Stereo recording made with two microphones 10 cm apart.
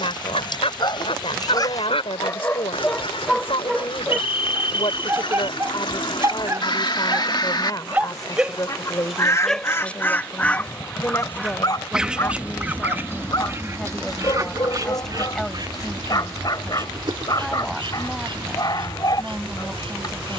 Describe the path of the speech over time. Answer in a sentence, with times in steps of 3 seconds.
In this clip you hear the speech on the left from 0 s and in the centre from 12 s.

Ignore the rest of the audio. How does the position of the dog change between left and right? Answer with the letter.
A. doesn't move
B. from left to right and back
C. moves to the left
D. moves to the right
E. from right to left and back
B.